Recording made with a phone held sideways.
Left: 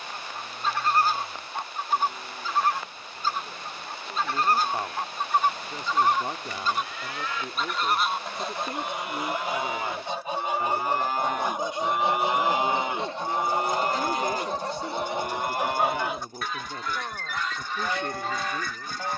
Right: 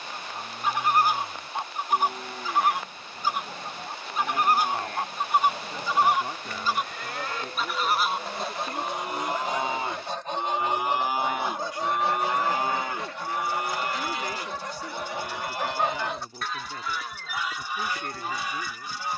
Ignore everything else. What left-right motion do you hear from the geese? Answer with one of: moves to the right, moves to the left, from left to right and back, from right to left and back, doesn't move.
from right to left and back.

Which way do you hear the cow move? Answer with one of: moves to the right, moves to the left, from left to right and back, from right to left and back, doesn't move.
moves to the left.